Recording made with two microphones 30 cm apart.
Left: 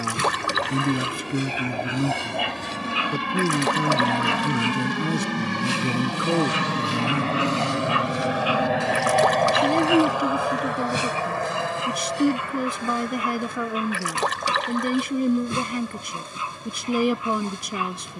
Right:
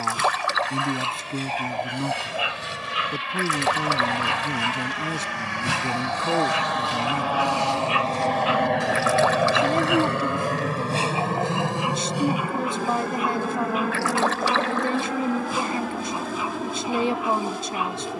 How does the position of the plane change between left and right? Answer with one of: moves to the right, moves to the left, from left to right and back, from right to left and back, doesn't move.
moves to the right.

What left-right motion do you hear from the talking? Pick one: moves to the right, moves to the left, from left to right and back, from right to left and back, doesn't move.
doesn't move.